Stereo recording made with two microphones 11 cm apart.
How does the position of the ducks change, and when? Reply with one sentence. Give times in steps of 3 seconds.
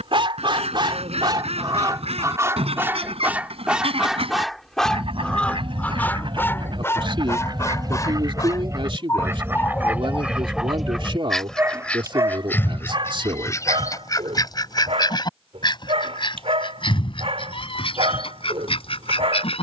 In this clip you hear the ducks on the right from 0 s, in the centre from 9 s and on the left from 12 s.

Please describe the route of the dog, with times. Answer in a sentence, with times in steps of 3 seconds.
In this clip you hear the dog on the right from 0 s, in the centre from 3 s, on the left from 6 s, in the centre from 9 s and on the right from 12 s.